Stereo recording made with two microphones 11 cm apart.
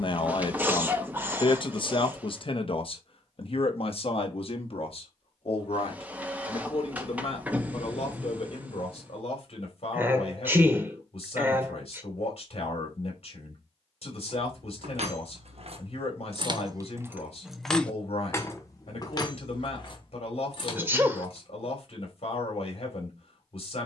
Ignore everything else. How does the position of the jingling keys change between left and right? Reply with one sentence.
In this clip you hear the jingling keys go from the right side to the left.